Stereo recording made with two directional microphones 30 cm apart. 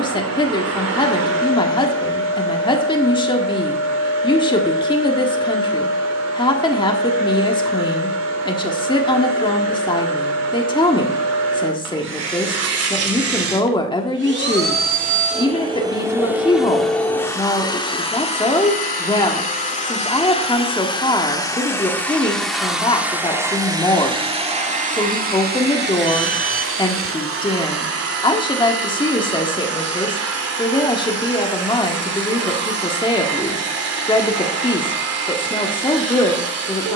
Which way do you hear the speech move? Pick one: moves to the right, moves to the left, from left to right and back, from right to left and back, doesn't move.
doesn't move.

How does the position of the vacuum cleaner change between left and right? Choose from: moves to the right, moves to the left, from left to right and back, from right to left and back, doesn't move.
from right to left and back.